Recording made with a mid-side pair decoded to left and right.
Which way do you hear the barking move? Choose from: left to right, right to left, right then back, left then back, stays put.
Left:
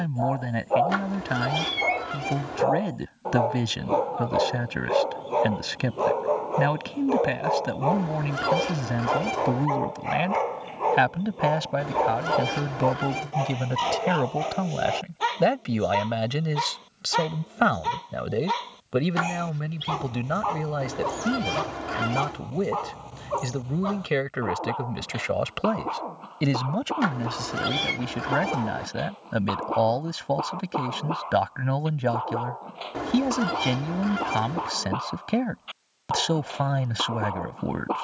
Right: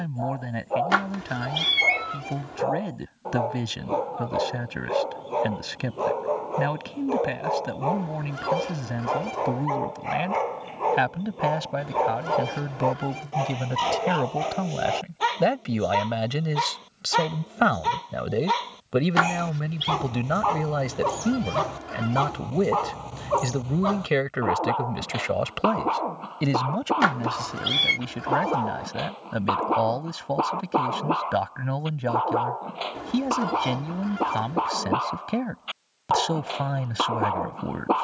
left to right.